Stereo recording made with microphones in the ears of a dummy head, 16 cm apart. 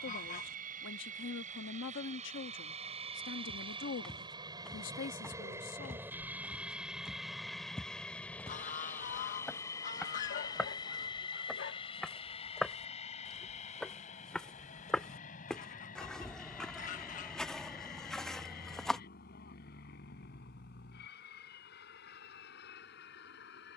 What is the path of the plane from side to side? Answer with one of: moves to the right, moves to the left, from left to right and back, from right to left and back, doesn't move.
moves to the left.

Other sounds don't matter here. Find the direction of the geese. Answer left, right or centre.
left.